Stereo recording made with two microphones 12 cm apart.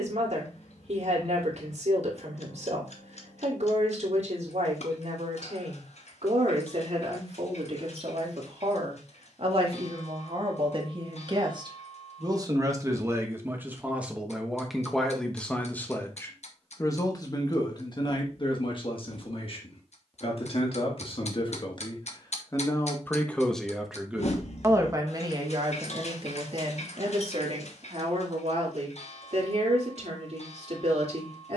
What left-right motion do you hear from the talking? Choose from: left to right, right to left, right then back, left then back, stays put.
left then back.